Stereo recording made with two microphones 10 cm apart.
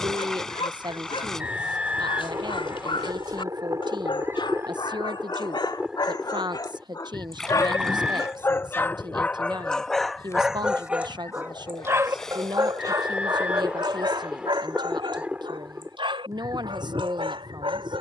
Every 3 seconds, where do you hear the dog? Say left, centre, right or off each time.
left, left, left, centre, right, right.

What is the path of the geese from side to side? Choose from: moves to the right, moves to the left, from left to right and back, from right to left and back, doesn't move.
from right to left and back.